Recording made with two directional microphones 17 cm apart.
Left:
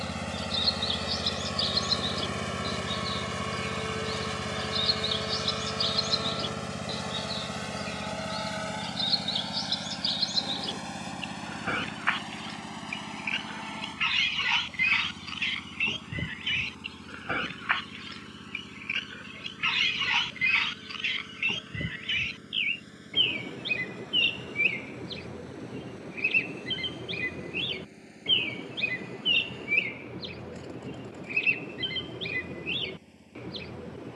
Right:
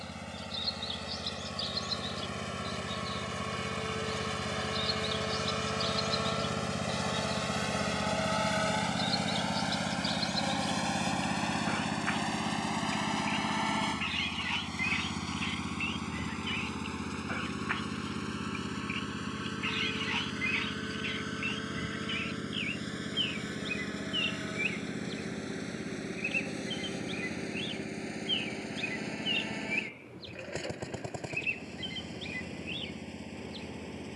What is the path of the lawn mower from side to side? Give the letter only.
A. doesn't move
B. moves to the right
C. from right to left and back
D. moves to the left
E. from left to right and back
B.